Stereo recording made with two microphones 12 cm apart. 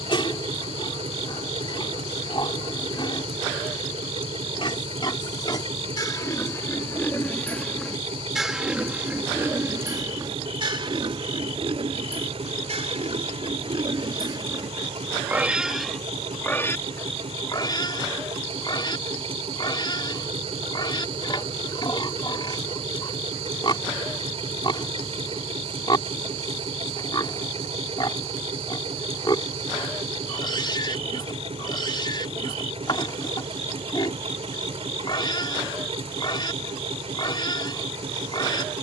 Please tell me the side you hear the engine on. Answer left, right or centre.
right.